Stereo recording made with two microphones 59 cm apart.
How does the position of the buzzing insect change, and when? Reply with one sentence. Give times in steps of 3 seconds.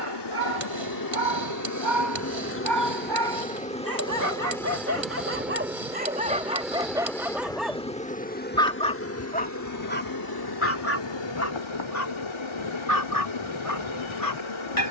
In this clip you hear the buzzing insect on the left from 0 s, in the centre from 3 s and on the left from 9 s.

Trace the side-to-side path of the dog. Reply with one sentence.
You can hear the dog travel towards the left.